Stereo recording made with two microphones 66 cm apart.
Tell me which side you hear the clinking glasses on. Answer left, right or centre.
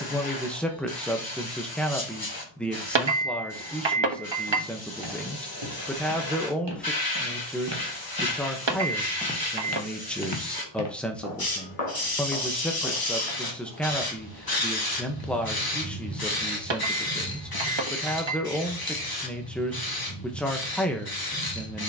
right.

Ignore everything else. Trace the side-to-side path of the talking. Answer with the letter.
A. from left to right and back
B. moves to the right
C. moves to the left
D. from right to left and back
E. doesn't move
E.